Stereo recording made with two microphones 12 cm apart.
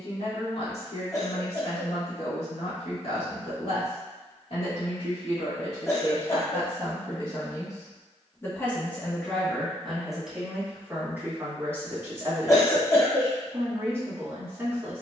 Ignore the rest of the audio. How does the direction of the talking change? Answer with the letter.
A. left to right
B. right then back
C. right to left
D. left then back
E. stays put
A.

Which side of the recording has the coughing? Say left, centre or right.
left.